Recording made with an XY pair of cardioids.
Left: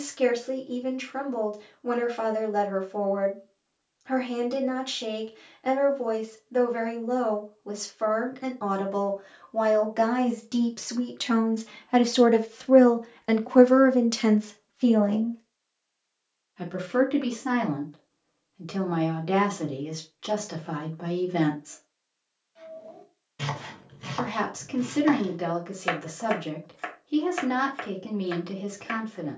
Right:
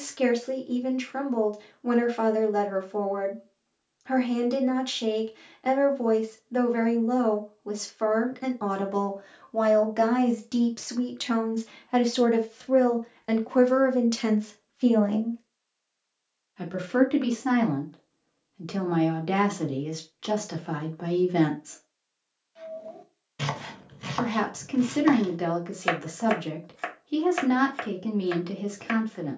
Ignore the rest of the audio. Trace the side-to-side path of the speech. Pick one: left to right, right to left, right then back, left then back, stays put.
left then back.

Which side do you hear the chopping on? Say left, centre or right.
right.